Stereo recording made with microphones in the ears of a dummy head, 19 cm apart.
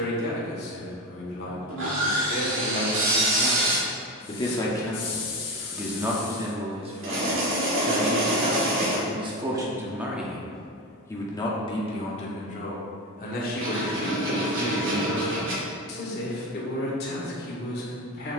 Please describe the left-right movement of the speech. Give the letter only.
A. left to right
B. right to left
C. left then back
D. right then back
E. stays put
D.